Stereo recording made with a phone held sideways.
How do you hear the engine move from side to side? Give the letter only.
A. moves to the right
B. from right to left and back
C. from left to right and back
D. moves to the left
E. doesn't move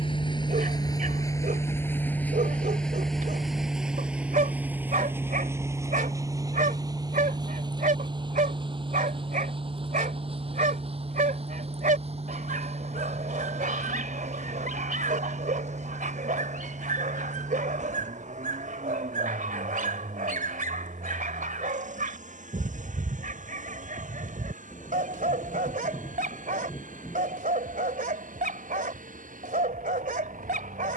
A.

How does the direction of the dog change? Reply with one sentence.
In this clip you hear the dog stay in one place.